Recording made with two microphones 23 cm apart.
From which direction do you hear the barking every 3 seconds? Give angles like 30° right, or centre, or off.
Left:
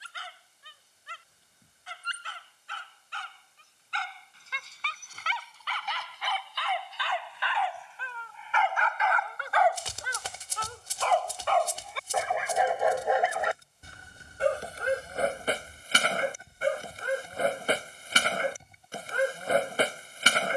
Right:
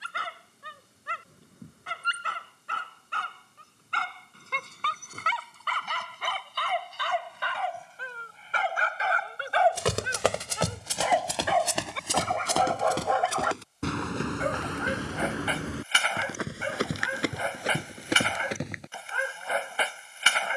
70° right, 60° right, 50° right, 20° right, 20° left, 40° left, 40° left.